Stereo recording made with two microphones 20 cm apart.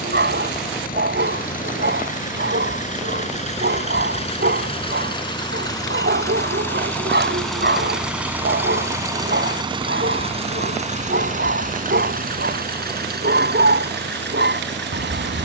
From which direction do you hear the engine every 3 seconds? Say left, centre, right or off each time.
left, left, centre, right, right.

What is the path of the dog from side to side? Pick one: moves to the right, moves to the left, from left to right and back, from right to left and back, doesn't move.
doesn't move.